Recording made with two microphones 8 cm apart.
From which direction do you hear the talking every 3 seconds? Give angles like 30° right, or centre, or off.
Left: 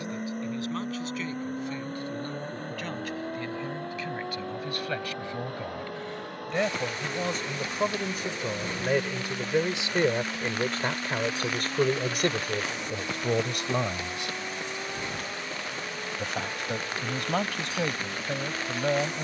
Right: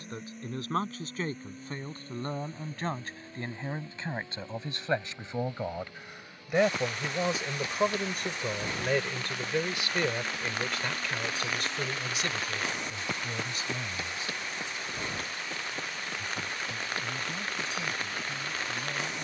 40° right, 20° right, centre, 30° left, 60° left, 80° left, 80° left.